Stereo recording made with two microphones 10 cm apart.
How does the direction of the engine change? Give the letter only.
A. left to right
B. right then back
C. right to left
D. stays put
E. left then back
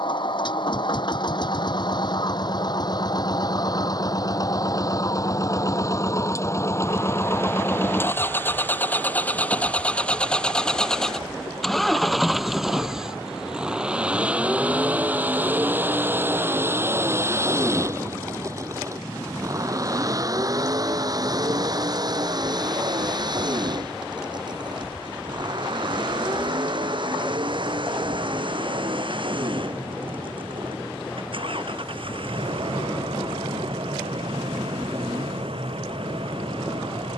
A.